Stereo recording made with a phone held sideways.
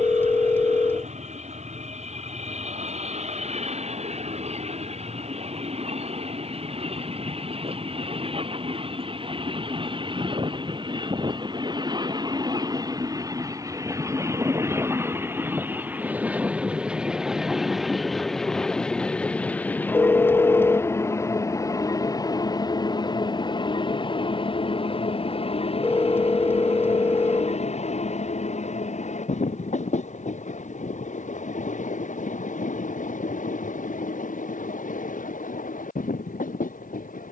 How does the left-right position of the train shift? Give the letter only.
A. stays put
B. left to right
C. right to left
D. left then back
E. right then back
C.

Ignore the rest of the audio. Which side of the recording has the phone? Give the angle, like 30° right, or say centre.
20° left.